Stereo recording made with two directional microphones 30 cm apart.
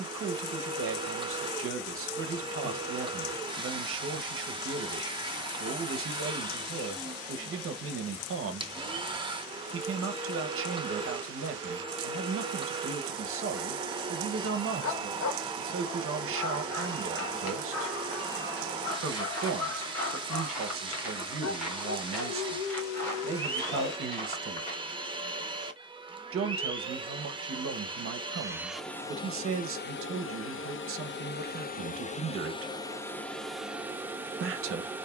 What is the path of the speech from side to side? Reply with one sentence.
In this clip you hear the speech stay put.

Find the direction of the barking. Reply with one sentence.
In this clip you hear the barking on the left.